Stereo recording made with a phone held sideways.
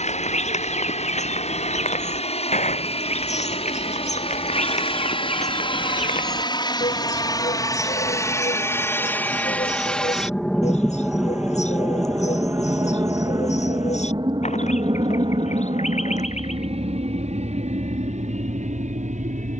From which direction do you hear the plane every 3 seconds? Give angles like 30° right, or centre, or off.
60° left, 50° left, 30° left, centre, 20° right, 40° right, 50° right.